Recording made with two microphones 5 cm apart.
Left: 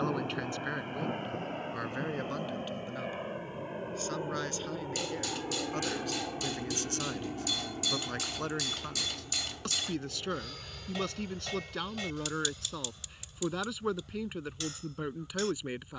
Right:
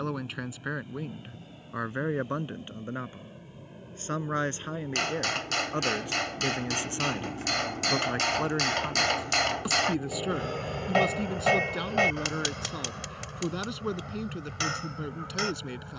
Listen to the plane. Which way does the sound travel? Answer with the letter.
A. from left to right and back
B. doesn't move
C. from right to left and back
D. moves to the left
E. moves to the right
E.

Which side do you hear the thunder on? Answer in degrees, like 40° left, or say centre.
70° left.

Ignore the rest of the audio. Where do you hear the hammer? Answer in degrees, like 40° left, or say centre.
60° right.